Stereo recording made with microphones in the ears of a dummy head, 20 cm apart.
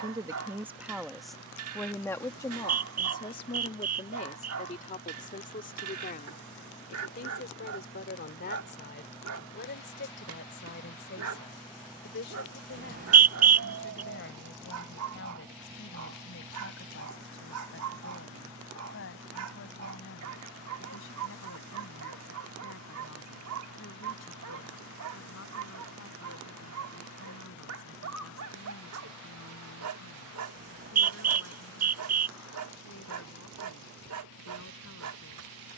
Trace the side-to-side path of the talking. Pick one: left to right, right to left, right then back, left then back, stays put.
right to left.